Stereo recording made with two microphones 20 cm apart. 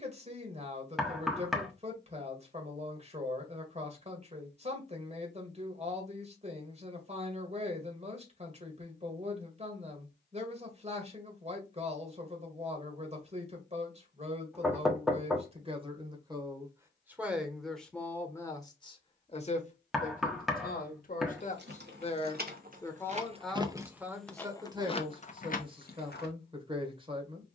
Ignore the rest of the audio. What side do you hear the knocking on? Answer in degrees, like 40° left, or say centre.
centre.